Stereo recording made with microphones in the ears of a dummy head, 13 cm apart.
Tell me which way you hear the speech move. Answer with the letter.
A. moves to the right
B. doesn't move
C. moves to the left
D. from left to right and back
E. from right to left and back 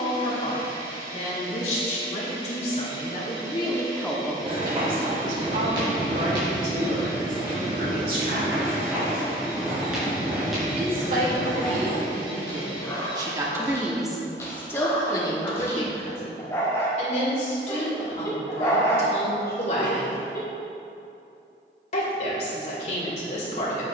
D.